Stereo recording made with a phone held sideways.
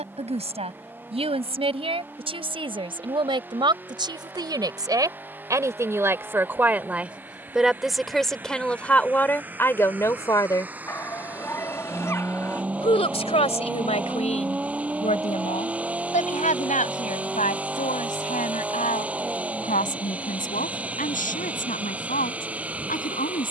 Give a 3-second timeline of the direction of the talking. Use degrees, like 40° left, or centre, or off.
40° right, 30° right, centre, 20° left, 50° left, 60° left, 70° left, 80° left.